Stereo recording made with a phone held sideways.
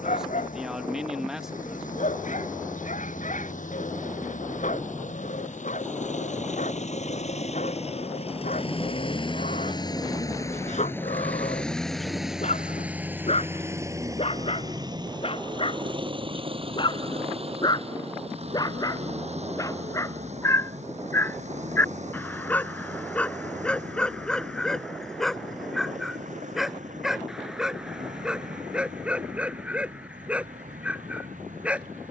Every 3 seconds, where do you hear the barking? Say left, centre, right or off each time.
left, left, left, left, left, left, left, centre, centre, centre, centre.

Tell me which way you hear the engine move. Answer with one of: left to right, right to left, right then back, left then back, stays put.
left to right.